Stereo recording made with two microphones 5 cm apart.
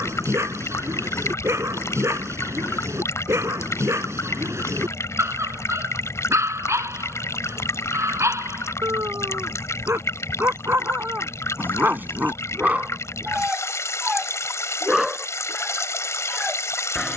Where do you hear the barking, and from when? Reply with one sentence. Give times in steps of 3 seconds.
In this clip you hear the barking on the right from 0 s and in the centre from 15 s.